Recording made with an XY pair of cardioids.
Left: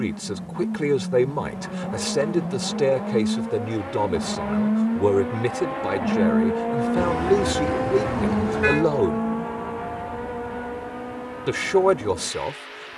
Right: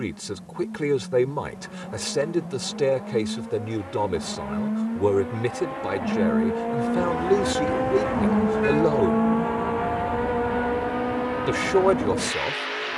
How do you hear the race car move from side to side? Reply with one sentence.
You can hear the race car move from left to right.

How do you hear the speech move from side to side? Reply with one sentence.
In this clip you hear the speech stay in one place.